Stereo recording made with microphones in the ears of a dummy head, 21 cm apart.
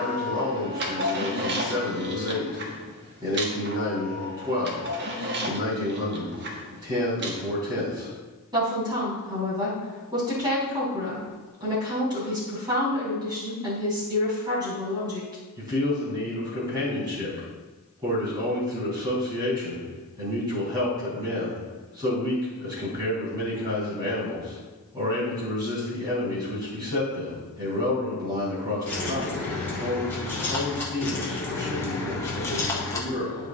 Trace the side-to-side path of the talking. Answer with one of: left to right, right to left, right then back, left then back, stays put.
stays put.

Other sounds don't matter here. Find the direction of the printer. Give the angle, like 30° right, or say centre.
50° right.